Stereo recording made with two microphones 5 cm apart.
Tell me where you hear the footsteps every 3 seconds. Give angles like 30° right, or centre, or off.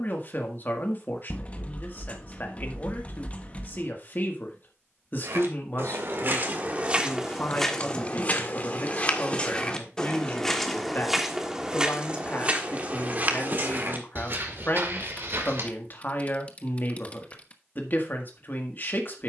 off, 60° right, centre, 10° left, 40° right, 60° right, off.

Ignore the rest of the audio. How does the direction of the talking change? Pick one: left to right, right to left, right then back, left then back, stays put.
stays put.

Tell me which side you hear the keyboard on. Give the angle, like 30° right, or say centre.
30° left.